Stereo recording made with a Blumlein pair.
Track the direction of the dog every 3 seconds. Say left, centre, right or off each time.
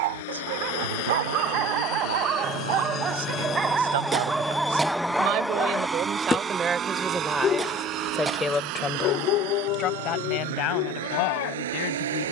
right, centre, left, left.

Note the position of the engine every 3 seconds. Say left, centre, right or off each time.
left, centre, right, right.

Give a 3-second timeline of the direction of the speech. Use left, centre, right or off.
right, right, centre, left.